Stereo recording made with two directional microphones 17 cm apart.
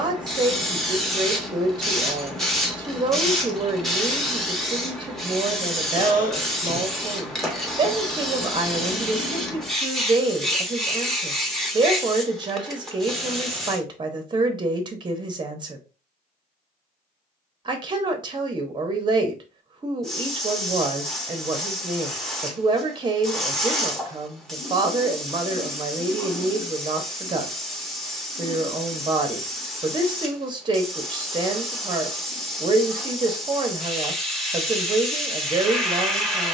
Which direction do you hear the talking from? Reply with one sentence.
You can hear the talking on the right.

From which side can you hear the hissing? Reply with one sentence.
In this clip you hear the hissing in the centre.